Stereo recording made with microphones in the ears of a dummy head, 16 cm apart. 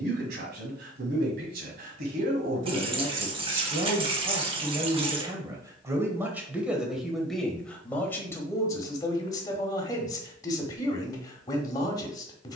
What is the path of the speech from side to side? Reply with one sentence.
In this clip you hear the speech move to the left.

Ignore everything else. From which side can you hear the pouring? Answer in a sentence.
In this clip you hear the pouring on the right.